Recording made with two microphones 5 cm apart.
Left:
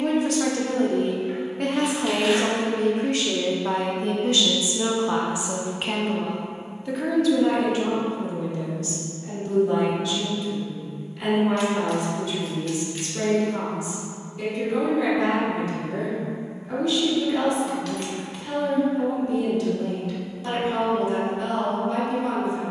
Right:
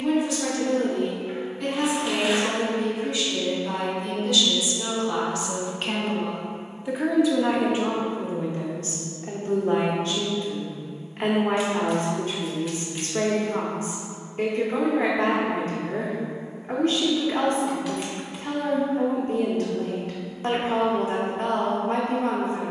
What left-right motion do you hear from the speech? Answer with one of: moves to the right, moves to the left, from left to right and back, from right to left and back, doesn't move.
moves to the right.